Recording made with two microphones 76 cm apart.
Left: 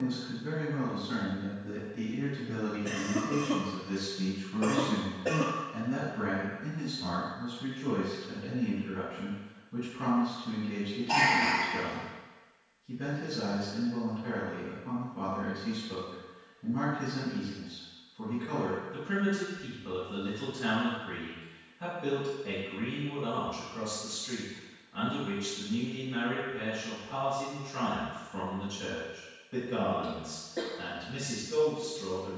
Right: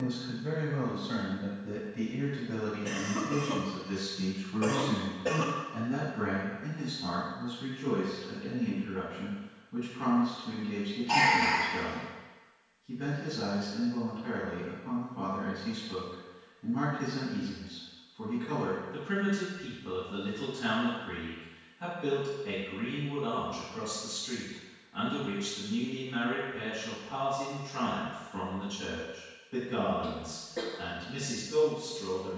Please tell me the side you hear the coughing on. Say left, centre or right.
right.